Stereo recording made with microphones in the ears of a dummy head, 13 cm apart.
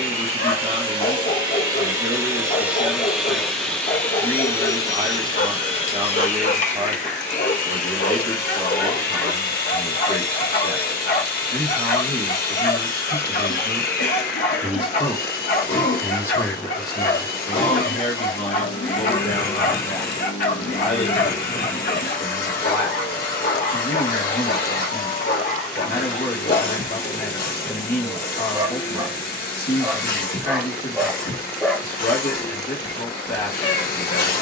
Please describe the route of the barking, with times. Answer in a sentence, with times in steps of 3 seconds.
You can hear the barking on the left from 0 s, in the centre from 27 s and on the left from 33 s.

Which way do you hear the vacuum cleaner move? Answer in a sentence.
You can hear the vacuum cleaner move to the left.